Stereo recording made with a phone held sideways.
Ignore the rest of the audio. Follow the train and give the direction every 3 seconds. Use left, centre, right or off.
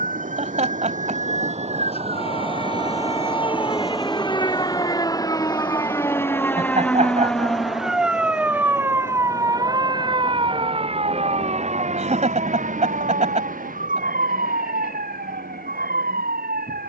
right, centre, left, left, left, left.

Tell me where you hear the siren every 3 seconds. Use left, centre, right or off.
left, left, centre, right, right, right.